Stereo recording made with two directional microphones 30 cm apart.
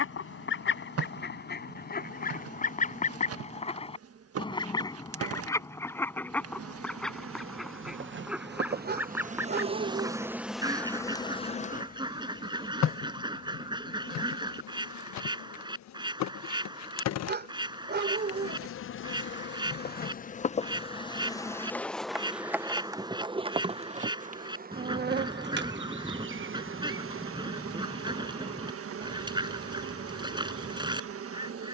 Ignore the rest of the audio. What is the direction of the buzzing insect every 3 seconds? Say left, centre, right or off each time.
right, right, right, centre, left, left, left, centre, right, right, right.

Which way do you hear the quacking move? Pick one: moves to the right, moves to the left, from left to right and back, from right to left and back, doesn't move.
moves to the right.